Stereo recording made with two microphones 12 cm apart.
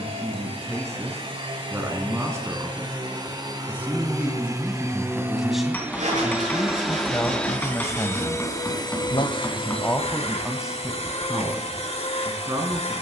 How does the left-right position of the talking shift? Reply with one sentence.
In this clip you hear the talking go left and come back.